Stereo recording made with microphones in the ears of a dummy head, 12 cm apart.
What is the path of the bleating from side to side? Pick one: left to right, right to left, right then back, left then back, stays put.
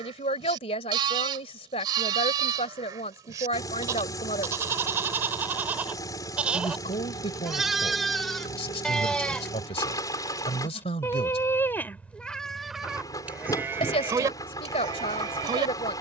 left then back.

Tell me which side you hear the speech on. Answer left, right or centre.
left.